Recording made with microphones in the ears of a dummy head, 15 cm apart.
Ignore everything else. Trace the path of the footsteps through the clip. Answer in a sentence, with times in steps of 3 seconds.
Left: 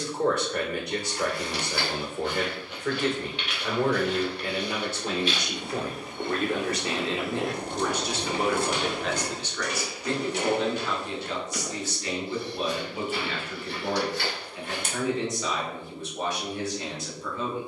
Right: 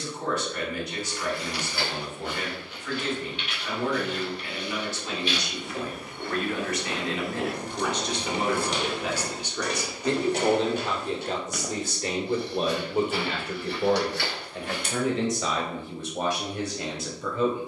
In this clip you hear the footsteps on the left from 0 s, in the centre from 6 s, on the right from 9 s and not at all from 15 s.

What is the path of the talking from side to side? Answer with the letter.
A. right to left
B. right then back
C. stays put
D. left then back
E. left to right
E.